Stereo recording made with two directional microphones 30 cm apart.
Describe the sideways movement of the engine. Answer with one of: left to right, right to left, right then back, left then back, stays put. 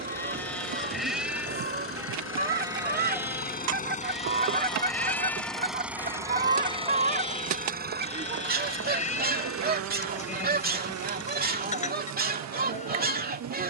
left to right.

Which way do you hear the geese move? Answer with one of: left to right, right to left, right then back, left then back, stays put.
stays put.